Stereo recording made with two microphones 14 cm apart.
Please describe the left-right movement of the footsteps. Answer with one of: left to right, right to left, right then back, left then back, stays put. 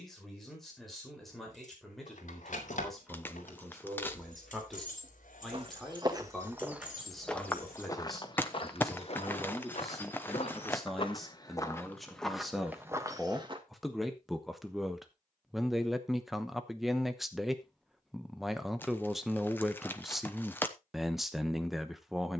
left then back.